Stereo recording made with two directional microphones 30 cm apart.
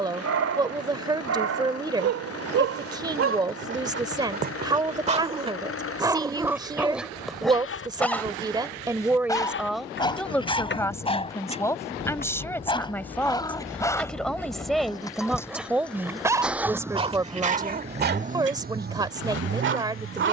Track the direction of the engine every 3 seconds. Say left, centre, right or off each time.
left, left, left, left, left, centre, right.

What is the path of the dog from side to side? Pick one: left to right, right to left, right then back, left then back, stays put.
left then back.